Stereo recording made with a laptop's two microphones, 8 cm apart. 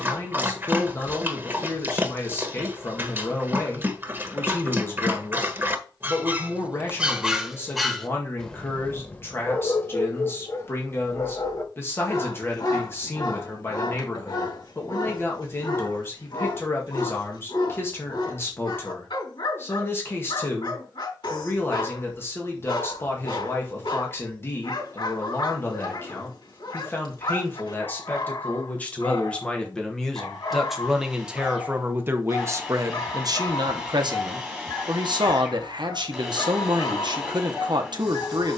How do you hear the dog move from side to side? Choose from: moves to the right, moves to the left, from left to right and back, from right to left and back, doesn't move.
moves to the left.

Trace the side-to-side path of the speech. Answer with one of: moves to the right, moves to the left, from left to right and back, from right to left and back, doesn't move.
moves to the right.